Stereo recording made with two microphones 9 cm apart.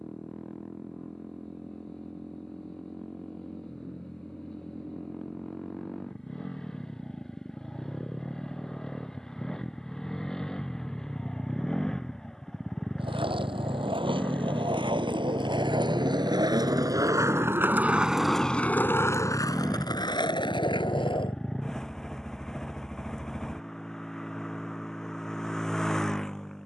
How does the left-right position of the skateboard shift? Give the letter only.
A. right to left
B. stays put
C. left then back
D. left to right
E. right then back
A.